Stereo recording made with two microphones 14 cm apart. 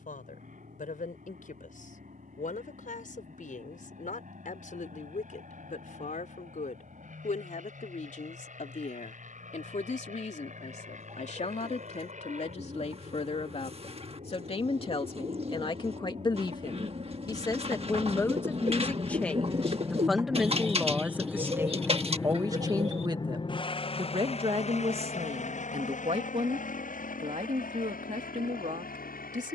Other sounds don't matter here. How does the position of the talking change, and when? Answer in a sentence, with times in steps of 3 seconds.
You can hear the talking on the left from 0 s, in the centre from 18 s and on the right from 21 s.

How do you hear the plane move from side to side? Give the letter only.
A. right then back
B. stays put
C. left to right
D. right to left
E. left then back
D.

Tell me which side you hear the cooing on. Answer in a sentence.
In this clip you hear the cooing on the right.